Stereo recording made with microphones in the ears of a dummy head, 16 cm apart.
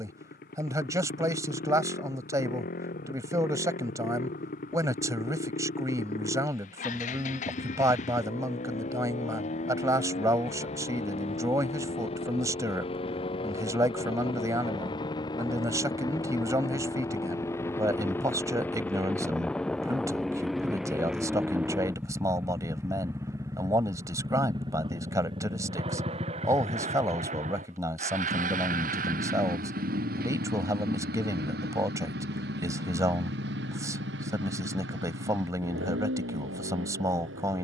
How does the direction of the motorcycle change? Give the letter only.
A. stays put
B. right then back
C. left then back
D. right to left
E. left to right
E.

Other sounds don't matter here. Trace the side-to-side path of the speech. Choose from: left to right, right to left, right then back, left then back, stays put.
stays put.